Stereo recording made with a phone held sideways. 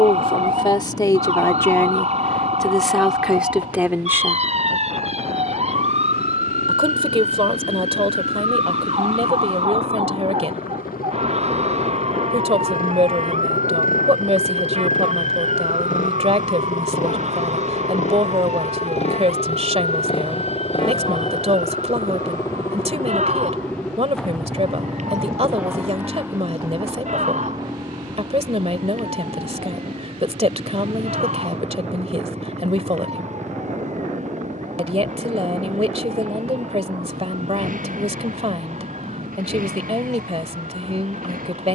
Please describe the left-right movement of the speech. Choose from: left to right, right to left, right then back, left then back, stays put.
left to right.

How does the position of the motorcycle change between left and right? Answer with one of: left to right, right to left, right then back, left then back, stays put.
left to right.